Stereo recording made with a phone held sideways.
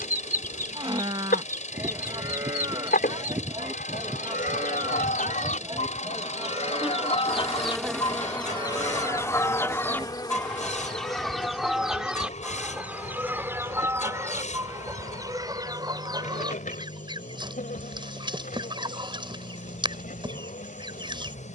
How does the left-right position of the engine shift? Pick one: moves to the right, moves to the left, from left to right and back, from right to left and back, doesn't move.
doesn't move.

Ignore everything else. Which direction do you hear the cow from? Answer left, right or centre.
right.